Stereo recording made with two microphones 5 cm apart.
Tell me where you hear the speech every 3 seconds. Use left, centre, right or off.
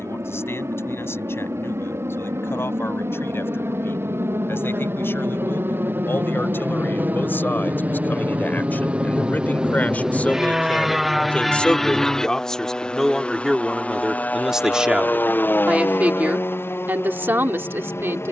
left, left, left, left, centre, right.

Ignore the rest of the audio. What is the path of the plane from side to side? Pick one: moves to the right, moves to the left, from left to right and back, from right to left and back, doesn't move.
moves to the left.